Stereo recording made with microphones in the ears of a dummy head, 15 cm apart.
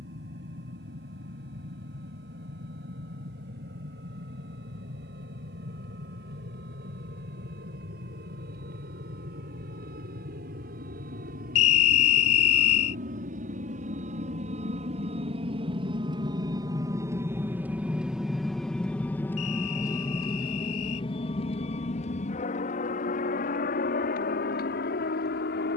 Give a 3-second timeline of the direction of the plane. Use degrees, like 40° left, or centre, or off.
80° right, 70° right, 70° right, 60° right, 50° right, 20° right, 10° left, 40° left, 60° left.